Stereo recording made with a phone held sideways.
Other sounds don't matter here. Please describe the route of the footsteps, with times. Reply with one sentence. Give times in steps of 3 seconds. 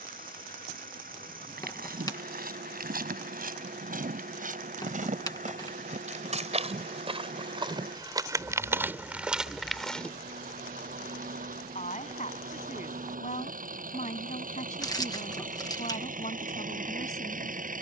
You can hear the footsteps on the right from 0 s, in the centre from 9 s and not at all from 12 s.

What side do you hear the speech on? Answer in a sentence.
You can hear the speech on the left.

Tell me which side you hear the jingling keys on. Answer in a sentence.
You can hear the jingling keys on the left.